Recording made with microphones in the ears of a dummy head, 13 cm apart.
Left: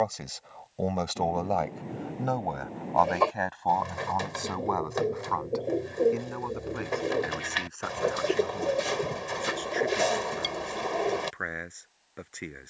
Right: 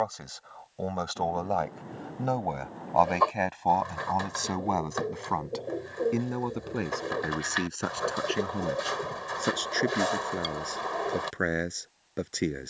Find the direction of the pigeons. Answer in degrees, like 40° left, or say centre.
20° left.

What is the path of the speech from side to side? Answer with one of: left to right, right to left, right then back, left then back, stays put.
left to right.